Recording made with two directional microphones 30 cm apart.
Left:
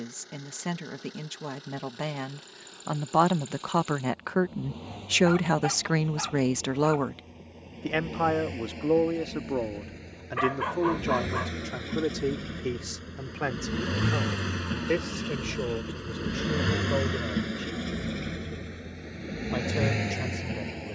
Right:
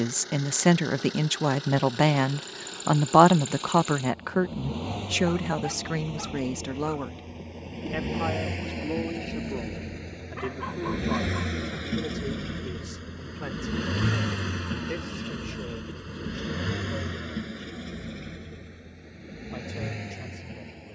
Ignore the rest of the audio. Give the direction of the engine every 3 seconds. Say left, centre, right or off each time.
right, right, right, right, centre, left, left.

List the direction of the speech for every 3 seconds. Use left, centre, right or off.
right, centre, left, left, left, left, left.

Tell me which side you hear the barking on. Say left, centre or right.
left.